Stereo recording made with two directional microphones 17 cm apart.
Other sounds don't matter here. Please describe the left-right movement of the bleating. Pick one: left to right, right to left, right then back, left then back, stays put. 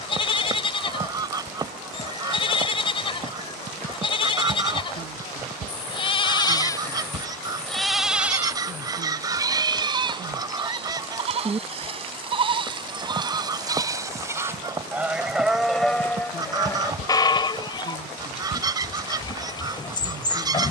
right then back.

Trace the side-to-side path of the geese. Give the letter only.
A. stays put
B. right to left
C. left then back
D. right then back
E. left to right
A.